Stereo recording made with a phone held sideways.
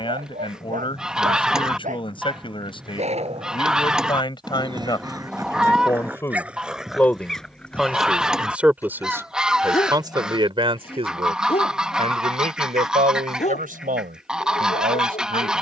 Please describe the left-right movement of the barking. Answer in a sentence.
In this clip you hear the barking go from the right side to the left.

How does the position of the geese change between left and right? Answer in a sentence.
In this clip you hear the geese stay put.